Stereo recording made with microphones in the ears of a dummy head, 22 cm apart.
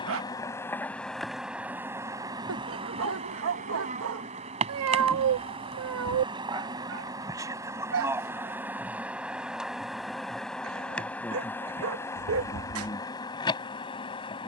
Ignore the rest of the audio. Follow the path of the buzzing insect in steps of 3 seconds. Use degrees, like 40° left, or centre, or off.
centre, 30° right, 10° right, centre, 20° left.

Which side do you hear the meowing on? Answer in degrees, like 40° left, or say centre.
60° right.